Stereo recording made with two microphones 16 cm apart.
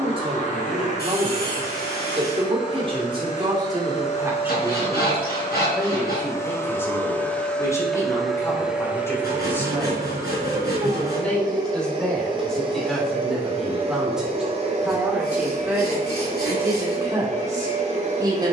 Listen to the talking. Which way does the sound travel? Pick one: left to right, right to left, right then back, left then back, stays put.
left then back.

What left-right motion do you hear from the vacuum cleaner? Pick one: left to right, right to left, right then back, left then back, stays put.
left to right.